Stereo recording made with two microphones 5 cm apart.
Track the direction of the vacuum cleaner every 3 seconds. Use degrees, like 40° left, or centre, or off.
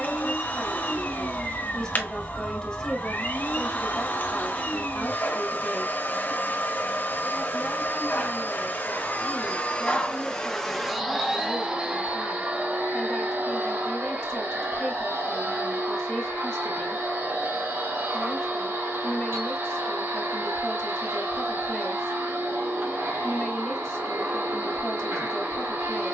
40° left, 40° left, 40° left, 10° left, 50° right, 60° right, 70° right, 70° right, 70° right.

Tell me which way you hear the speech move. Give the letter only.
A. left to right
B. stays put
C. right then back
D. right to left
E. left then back
B.